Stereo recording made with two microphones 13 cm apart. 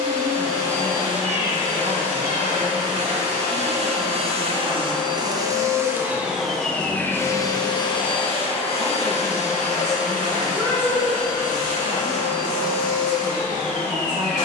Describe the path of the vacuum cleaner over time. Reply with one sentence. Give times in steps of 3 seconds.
In this clip you hear the vacuum cleaner on the right from 0 s and on the left from 6 s.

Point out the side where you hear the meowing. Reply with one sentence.
In this clip you hear the meowing on the right.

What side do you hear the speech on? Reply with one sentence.
In this clip you hear the speech on the right.